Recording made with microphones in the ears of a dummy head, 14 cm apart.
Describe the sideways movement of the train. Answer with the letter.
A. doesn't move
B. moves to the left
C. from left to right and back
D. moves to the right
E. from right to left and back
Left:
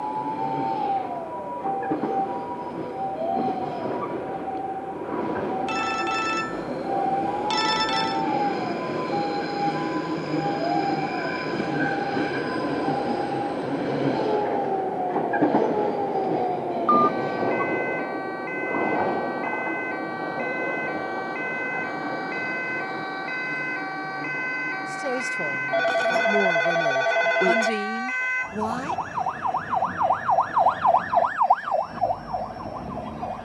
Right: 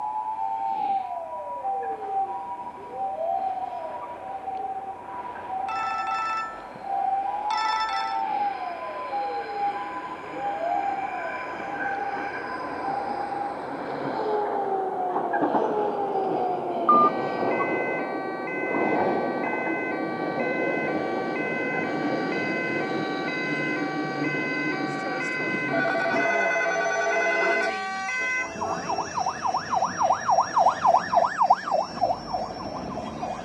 D.